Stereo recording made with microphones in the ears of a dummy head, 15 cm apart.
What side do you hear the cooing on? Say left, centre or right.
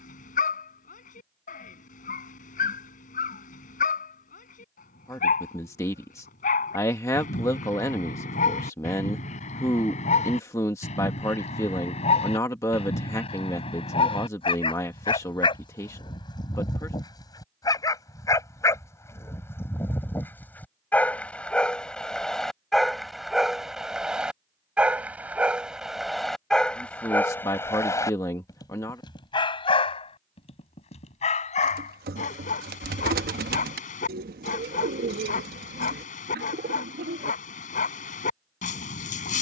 right.